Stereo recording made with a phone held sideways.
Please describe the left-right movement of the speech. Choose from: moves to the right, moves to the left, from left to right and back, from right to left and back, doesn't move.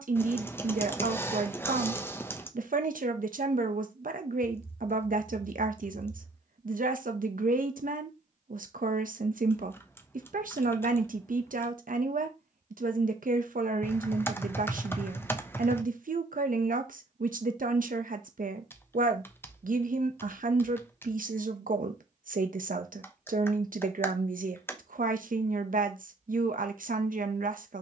doesn't move.